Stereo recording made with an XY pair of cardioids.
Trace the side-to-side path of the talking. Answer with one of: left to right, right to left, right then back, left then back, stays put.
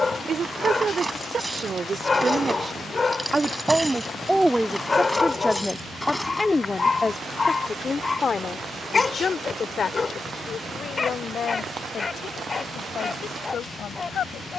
right to left.